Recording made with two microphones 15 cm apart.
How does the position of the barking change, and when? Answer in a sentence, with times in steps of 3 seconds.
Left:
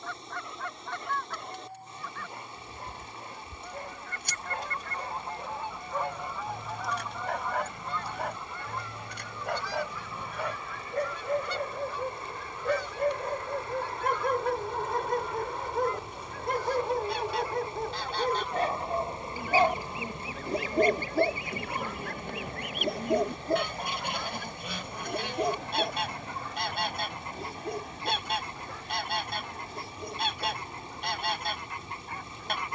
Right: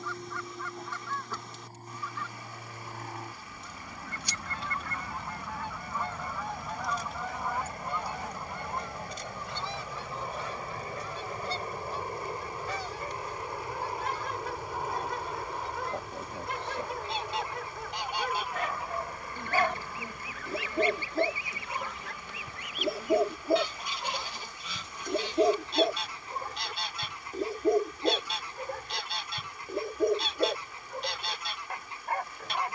In this clip you hear the barking on the left from 0 s, in the centre from 21 s and on the right from 24 s.